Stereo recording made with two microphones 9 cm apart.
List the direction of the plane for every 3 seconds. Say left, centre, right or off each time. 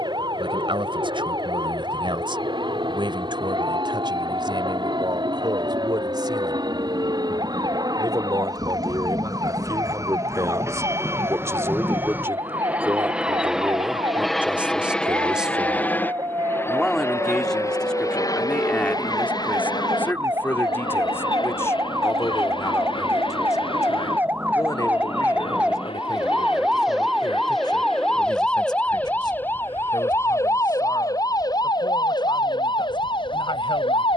right, right, right, right, centre, left, left, left, left, left, left, left.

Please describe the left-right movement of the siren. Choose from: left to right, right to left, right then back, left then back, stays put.
right to left.